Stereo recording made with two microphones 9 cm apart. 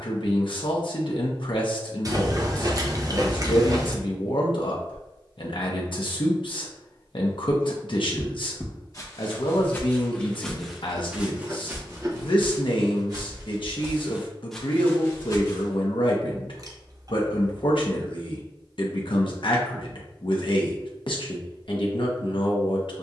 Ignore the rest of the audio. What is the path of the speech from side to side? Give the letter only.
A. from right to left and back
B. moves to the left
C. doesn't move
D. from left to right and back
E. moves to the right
C.